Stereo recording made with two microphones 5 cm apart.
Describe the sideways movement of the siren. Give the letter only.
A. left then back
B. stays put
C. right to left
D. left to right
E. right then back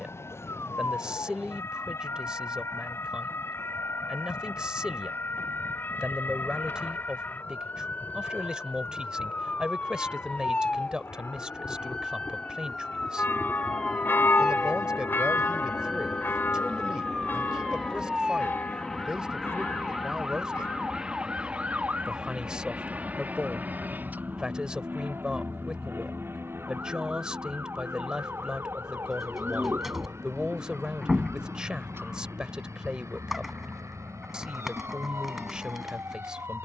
D.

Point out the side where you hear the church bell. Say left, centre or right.
left.